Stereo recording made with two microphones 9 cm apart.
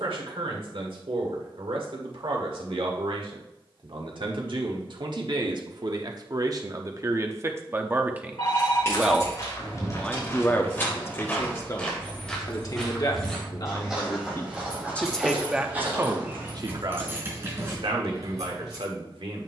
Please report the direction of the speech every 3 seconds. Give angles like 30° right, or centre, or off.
70° right, 60° right, 30° right, 20° left, 40° left, 30° right, 70° right.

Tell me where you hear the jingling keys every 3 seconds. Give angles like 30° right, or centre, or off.
off, off, 30° left, 20° left, 10° left, 20° right, 40° right.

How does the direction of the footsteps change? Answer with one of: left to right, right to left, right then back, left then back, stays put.
left to right.